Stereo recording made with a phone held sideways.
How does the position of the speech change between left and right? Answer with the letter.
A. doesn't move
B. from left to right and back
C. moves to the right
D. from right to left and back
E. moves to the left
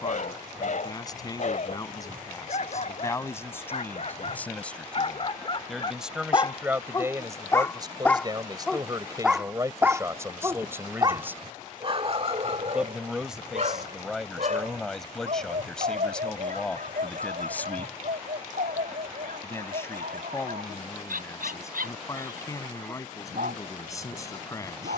B.